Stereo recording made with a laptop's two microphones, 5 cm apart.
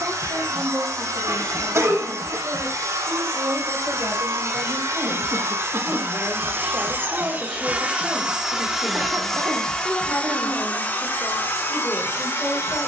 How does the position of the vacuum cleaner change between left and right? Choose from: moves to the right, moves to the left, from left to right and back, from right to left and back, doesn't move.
moves to the left.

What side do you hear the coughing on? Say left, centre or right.
right.